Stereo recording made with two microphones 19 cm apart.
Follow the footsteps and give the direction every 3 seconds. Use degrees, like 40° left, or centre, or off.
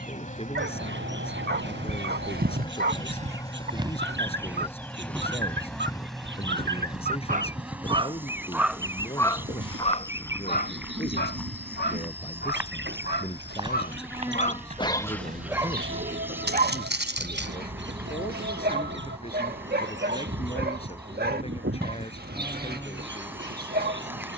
60° right, 10° right, 30° left, 10° left, 20° right, 60° right, off, off.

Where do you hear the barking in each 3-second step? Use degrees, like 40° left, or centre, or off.
60° right, 60° right, 30° right, 40° left, 50° left, 40° right, 50° right, 50° right.